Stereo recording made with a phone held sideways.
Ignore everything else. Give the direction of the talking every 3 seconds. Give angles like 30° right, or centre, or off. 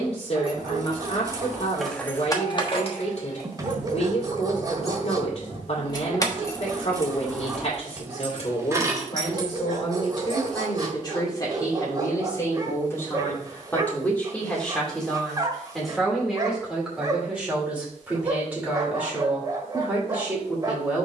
50° left, 50° left, 50° left, 40° left, 10° left, centre, 10° right.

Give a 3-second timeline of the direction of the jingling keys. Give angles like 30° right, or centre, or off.
centre, 50° left, centre, 30° right, off, off, off.